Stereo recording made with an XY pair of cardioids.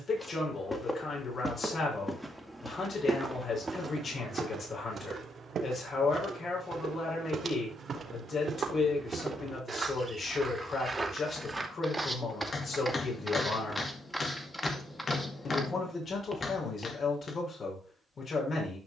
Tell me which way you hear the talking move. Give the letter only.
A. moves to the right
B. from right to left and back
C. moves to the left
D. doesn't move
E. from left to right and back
D.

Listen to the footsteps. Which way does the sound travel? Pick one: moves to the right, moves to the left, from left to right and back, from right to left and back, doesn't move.
from left to right and back.